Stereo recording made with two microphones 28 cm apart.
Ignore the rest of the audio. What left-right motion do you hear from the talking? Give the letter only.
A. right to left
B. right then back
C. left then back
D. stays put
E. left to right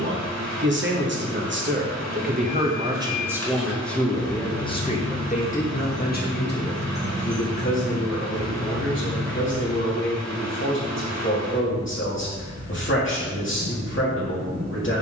A.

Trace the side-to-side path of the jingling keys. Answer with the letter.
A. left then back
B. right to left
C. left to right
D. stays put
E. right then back
C.